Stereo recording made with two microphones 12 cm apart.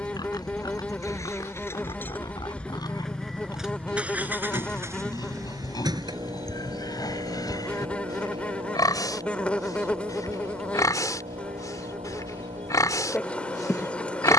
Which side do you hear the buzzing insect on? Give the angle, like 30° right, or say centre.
10° left.